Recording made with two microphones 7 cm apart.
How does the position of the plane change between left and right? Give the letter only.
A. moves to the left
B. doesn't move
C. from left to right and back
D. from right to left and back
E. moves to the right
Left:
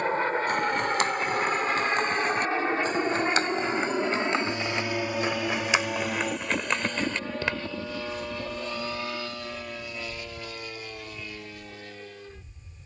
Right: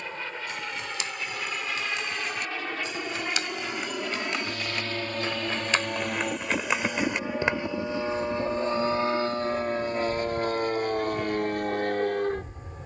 E.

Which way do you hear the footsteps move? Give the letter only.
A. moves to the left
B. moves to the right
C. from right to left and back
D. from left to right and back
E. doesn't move
B.